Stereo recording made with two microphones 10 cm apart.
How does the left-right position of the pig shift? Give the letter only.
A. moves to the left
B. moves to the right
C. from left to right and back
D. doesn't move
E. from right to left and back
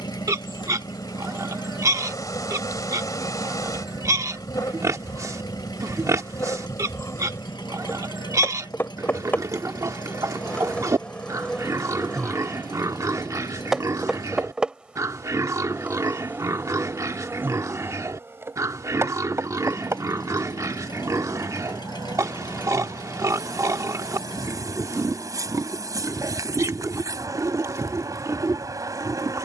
D.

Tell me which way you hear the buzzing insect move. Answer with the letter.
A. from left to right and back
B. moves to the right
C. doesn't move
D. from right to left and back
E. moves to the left
B.